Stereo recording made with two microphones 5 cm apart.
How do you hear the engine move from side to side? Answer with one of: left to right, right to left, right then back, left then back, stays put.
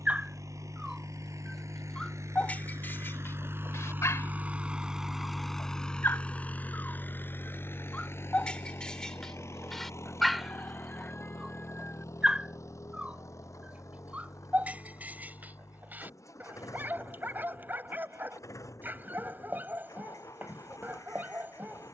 right to left.